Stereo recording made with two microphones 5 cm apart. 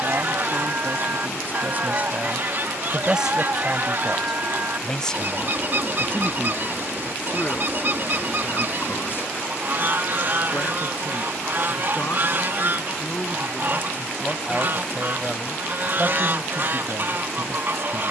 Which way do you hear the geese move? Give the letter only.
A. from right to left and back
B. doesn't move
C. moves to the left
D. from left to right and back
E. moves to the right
B.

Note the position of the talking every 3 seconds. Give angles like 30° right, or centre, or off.
40° right, centre, 30° left, 50° left, 20° left, 30° right.